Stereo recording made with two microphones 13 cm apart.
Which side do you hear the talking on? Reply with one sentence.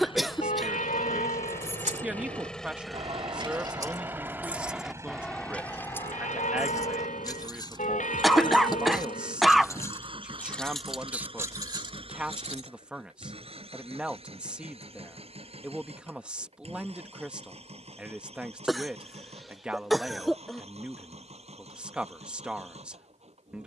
You can hear the talking in the centre.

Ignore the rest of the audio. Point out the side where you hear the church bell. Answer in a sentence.
In this clip you hear the church bell on the left.